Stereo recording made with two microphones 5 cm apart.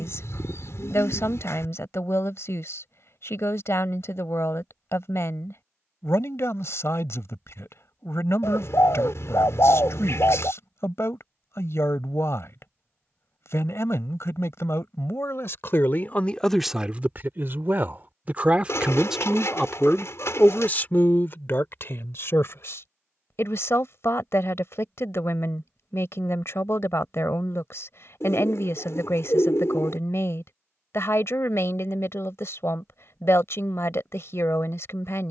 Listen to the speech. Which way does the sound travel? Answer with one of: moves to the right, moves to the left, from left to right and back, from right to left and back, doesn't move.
from left to right and back.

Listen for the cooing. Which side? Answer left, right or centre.
left.